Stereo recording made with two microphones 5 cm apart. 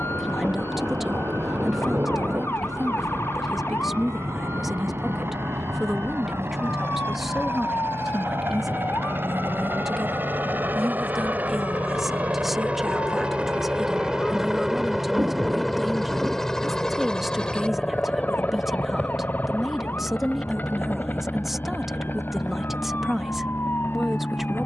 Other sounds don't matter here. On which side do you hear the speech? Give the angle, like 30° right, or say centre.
10° right.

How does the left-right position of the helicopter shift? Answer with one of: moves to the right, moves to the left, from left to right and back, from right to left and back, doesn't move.
moves to the left.